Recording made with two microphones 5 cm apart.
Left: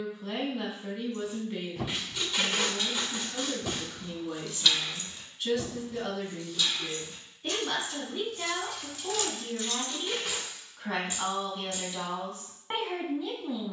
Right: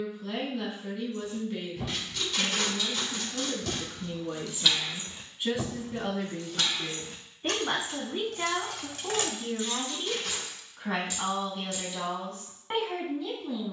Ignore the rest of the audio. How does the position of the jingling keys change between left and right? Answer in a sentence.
In this clip you hear the jingling keys move from left to right and back again.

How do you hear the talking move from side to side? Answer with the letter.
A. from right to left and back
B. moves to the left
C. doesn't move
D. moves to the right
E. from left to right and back
E.